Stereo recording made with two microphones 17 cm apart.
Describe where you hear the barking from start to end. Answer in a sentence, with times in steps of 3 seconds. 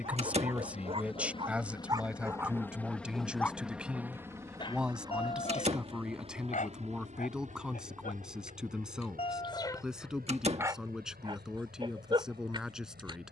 In this clip you hear the barking on the right from 0 s, on the left from 3 s, in the centre from 9 s and on the right from 12 s.